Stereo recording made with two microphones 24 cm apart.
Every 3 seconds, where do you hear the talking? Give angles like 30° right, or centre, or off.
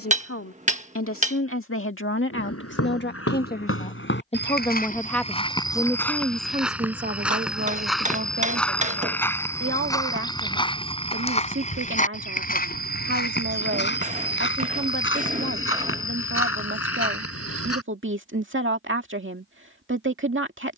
60° left, 20° left, 40° right, 60° right, 60° right, 60° right, 60° right.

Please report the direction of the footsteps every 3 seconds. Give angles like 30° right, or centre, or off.
80° left, 40° left, centre, 20° left, 50° left, 70° left, off.